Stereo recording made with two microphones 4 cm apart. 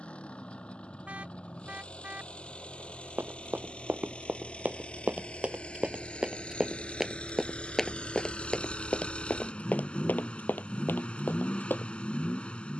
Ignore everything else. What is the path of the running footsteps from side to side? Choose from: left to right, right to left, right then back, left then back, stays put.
right to left.